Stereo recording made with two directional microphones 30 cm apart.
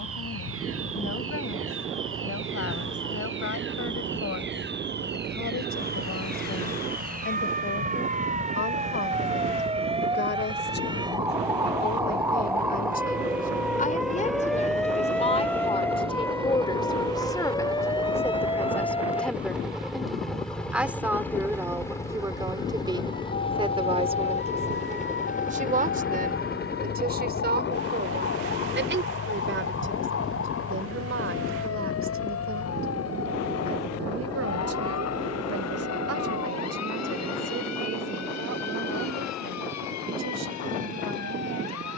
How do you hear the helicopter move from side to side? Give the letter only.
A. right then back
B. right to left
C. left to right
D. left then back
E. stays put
B.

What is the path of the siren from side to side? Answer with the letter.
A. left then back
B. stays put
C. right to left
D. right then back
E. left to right
C.